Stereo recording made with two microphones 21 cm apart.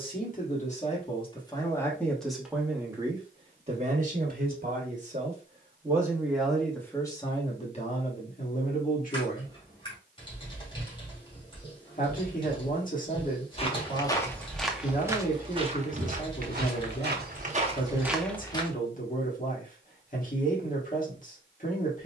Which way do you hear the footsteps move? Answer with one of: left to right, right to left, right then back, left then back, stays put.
right then back.